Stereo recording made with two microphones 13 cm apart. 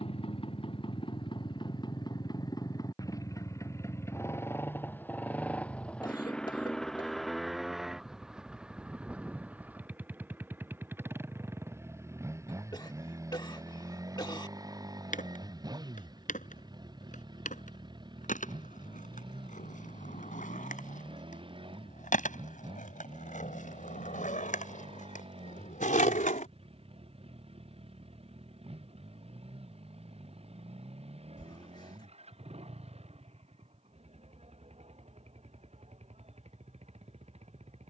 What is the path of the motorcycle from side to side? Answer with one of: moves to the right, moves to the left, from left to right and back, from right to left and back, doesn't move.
moves to the right.